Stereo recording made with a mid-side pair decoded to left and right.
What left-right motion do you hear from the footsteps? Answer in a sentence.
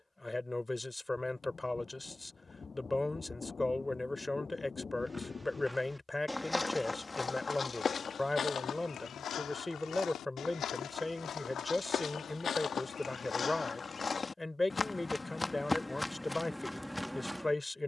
You can hear the footsteps move from right to left and back again.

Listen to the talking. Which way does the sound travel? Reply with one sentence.
In this clip you hear the talking stay put.